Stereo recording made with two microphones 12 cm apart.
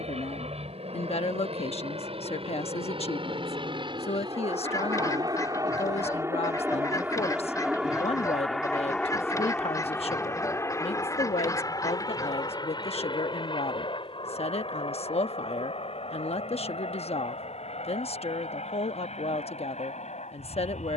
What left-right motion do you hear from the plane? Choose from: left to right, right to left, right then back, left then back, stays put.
right to left.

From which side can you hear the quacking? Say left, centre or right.
left.